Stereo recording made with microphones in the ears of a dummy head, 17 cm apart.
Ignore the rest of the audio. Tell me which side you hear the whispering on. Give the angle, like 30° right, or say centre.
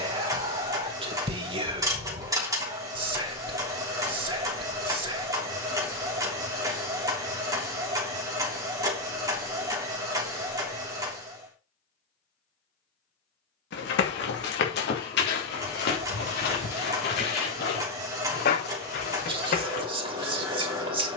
30° right.